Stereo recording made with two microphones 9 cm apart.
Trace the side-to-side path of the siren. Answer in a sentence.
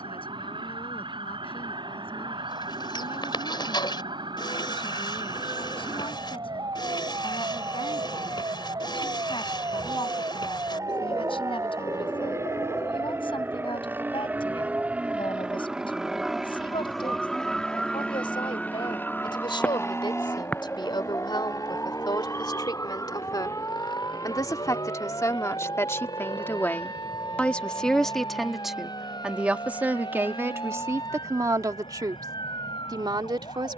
You can hear the siren move from right to left.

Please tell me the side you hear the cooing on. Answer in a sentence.
In this clip you hear the cooing on the left.